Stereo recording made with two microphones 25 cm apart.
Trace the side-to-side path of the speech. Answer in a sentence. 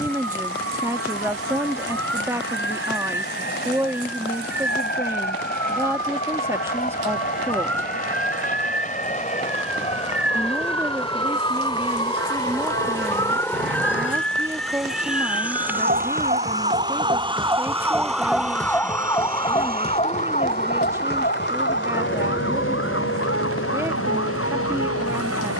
You can hear the speech stay in one place.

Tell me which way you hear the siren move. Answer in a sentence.
In this clip you hear the siren move from right to left.